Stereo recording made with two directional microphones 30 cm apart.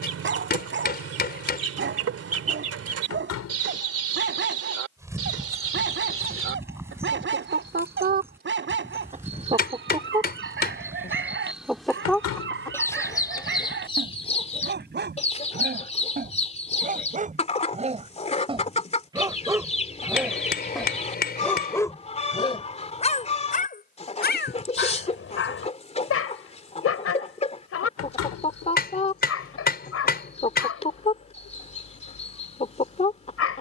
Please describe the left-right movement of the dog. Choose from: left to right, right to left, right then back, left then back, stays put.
right to left.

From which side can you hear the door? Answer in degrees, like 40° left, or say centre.
60° left.